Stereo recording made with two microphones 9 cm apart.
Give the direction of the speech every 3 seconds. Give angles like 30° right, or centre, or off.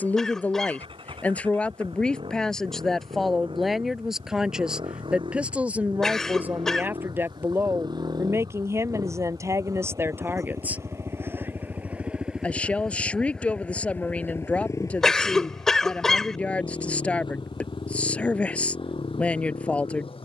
10° left, 10° right, 20° right, 30° right, 10° left, 10° left, 10° left.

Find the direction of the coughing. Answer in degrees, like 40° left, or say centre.
10° left.